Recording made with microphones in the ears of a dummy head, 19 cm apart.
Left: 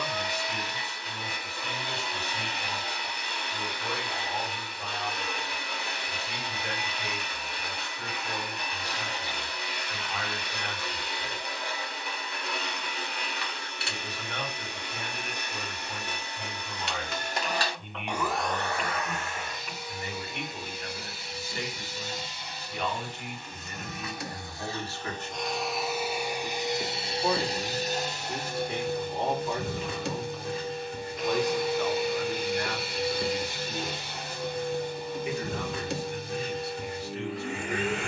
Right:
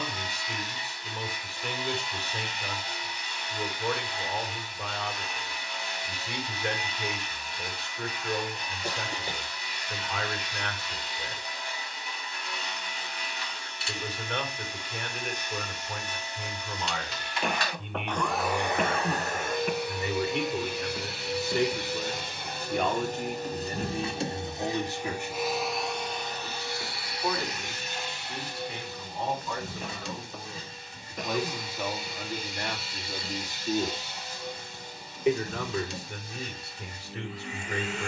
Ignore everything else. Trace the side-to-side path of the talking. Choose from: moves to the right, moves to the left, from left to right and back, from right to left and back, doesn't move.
from right to left and back.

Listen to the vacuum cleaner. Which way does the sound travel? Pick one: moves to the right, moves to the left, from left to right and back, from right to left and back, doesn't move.
from left to right and back.